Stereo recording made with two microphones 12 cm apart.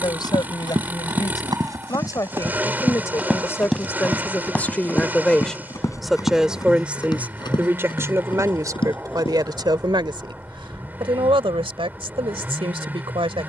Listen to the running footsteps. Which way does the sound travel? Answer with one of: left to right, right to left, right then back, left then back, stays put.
right to left.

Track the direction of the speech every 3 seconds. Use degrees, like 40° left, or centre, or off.
40° left, 20° left, 20° right, 50° right, 50° right.